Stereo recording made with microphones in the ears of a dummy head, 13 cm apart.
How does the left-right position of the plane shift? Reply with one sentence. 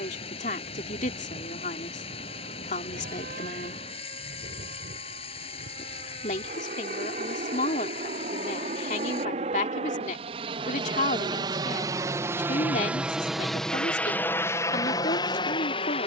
You can hear the plane travel towards the left.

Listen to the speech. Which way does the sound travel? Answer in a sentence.
In this clip you hear the speech stay in one place.